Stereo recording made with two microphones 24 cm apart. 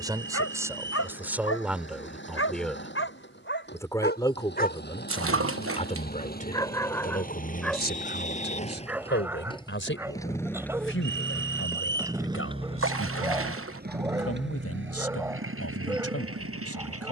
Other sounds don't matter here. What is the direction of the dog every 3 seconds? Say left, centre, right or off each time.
left, left, centre, centre, centre, centre.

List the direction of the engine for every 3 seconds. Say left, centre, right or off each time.
left, left, left, centre, right, right.